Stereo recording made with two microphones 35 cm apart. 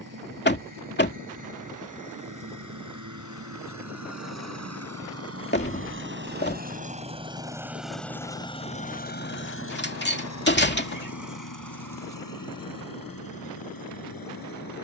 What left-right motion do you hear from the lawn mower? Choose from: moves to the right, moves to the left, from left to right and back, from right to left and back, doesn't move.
moves to the left.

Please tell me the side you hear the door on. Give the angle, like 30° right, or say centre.
30° left.